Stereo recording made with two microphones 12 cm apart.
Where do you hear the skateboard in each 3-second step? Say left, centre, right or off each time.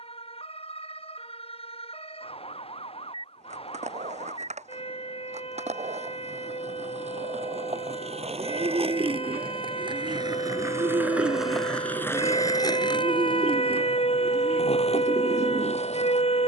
off, right, right, right, left, left.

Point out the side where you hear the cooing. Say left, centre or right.
right.